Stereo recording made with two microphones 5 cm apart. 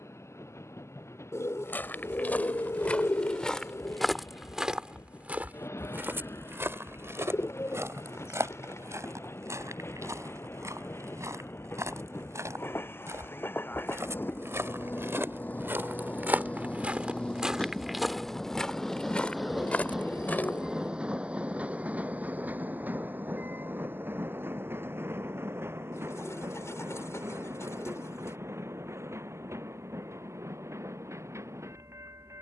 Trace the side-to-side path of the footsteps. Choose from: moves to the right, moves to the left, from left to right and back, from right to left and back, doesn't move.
from left to right and back.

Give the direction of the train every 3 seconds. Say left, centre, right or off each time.
left, left, left, left, left, left, centre, right, right, right, right.